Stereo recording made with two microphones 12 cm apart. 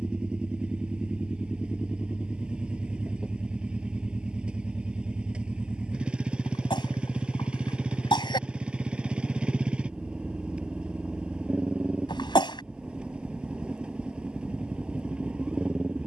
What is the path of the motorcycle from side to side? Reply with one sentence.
In this clip you hear the motorcycle stay in one place.